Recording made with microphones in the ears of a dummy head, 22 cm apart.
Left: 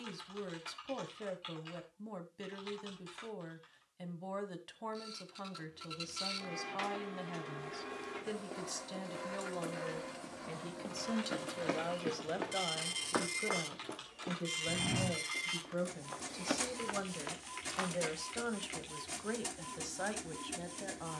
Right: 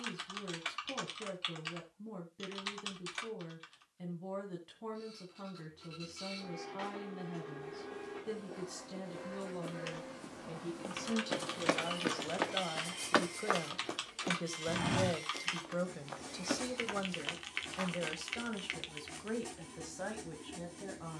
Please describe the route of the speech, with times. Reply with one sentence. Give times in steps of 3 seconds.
You can hear the speech on the left from 0 s, in the centre from 12 s and on the left from 18 s.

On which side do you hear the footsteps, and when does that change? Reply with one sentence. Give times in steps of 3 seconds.
You can hear the footsteps not at all from 0 s, on the left from 6 s, in the centre from 9 s, on the right from 12 s, in the centre from 15 s and not at all from 18 s.